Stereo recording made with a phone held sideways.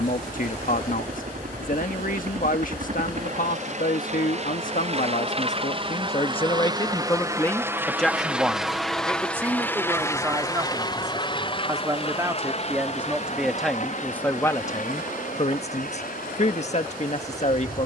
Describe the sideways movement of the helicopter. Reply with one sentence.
In this clip you hear the helicopter move to the left.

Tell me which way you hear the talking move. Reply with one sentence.
In this clip you hear the talking move from left to right and back again.